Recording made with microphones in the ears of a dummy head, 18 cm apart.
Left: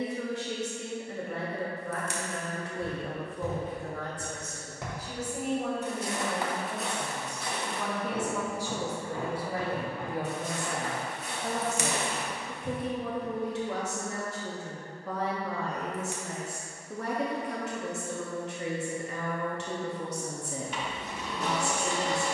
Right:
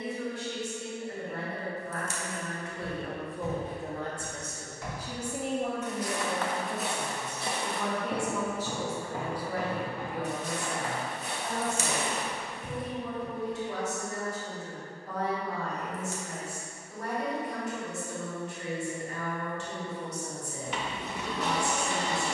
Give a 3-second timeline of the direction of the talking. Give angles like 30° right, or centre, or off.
50° left, 20° right, centre, 40° left, 60° left, 60° left, 60° left, 60° left.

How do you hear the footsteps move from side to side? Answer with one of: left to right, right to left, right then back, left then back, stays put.
left to right.